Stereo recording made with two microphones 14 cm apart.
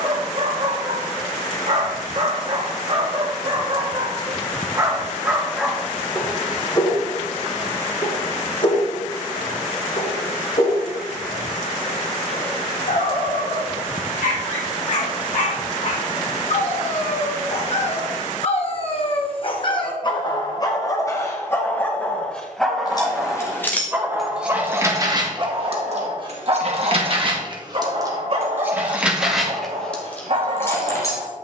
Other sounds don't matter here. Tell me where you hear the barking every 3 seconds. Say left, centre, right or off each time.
right, right, left, left, left, left, left, centre, right, right, right.